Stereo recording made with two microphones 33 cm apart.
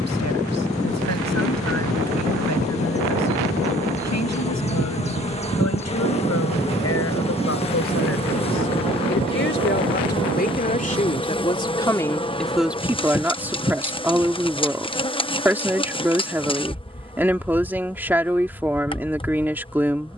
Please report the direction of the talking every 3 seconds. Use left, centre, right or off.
left, left, left, left, centre, centre, centre.